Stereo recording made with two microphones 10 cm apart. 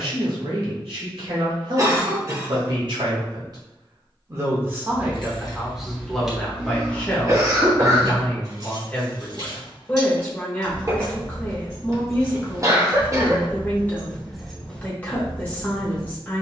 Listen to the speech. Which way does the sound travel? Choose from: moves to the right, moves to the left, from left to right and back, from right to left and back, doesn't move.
moves to the left.